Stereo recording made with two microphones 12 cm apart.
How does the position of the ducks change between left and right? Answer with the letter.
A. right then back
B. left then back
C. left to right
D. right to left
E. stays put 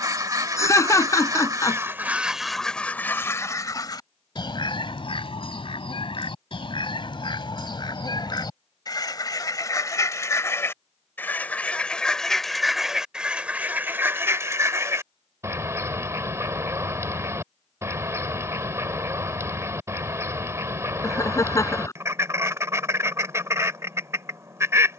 B.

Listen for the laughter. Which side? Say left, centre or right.
left.